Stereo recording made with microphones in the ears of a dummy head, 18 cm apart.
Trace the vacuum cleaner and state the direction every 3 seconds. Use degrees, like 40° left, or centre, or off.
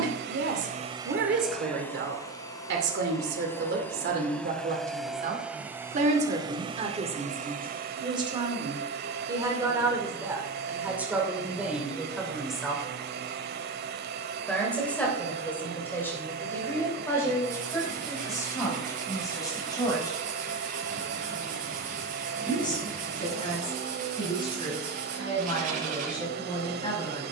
10° right, centre, 40° right, 50° right, 50° right, 50° right, 50° right, 50° right, 50° right.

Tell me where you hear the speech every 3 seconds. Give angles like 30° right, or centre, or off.
60° right, 50° right, 30° right, 10° right, centre, 10° left, 20° left, 20° left, 30° left.